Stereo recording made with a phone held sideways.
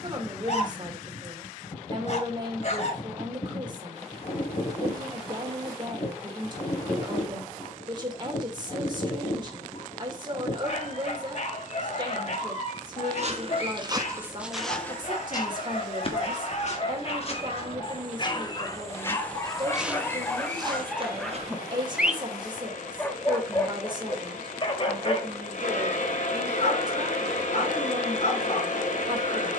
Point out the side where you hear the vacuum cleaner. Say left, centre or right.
left.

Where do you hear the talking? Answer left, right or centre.
right.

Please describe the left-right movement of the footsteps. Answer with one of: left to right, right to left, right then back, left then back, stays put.
left then back.